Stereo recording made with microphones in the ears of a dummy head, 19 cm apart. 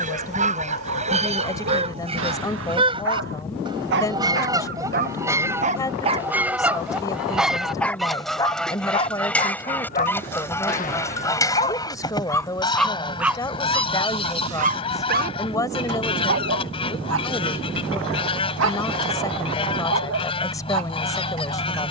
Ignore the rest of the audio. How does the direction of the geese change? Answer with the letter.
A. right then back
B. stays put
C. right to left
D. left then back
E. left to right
C.